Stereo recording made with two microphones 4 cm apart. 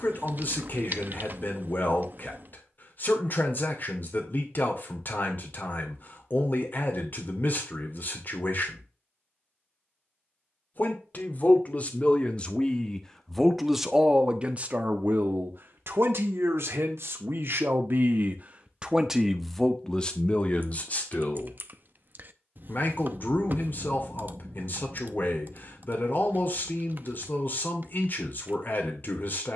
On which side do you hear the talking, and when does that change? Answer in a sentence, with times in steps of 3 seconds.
In this clip you hear the talking on the left from 0 s, in the centre from 12 s, on the right from 15 s, in the centre from 18 s and on the left from 21 s.